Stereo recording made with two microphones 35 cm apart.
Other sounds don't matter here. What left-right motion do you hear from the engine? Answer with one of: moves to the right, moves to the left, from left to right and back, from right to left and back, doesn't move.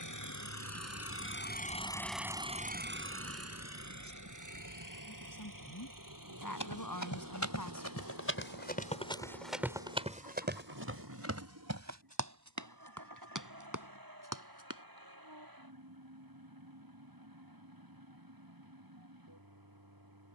moves to the right.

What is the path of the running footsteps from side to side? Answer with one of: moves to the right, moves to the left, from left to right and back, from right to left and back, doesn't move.
moves to the right.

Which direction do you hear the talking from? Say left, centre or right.
left.